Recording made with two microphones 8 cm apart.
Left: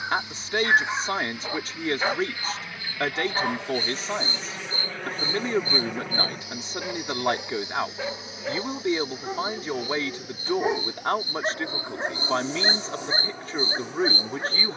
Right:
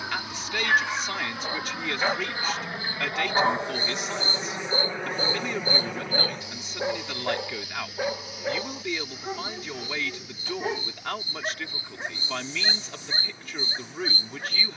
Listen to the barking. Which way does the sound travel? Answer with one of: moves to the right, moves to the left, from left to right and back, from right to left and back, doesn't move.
from left to right and back.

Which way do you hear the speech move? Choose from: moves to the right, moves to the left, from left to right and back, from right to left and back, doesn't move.
doesn't move.